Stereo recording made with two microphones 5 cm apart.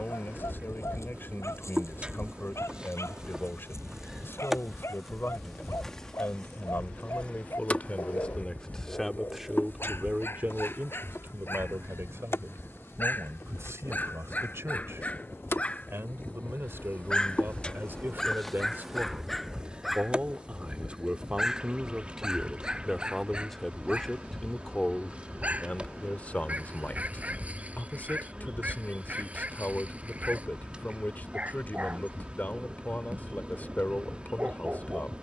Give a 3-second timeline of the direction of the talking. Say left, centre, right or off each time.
left, left, left, right, right, right, right, centre, left, left, left, left.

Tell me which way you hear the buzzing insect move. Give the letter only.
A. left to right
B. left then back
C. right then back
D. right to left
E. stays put
B.